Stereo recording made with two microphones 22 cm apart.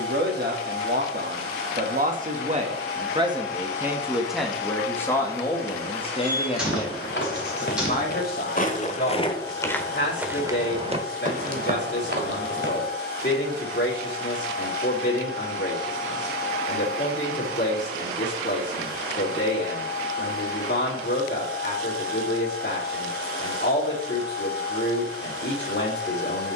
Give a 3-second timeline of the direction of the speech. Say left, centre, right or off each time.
right, centre, left, left, left, left, left, left, left.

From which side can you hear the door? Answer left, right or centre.
centre.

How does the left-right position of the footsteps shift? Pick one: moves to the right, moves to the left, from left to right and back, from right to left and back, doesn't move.
moves to the right.